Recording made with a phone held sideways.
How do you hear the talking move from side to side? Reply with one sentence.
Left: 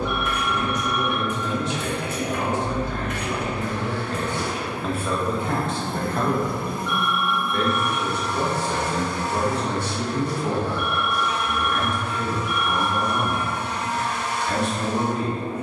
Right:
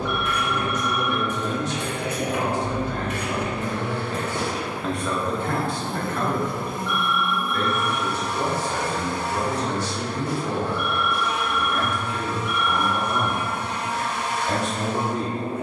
You can hear the talking move from right to left and back again.